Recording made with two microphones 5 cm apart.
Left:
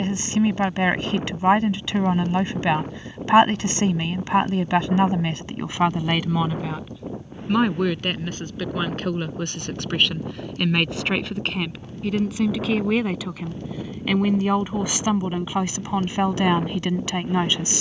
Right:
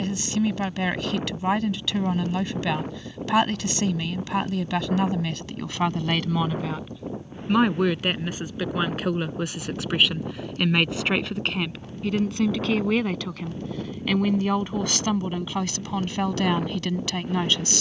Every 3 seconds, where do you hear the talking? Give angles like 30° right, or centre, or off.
30° left, 30° left, centre, centre, 10° left, 20° left.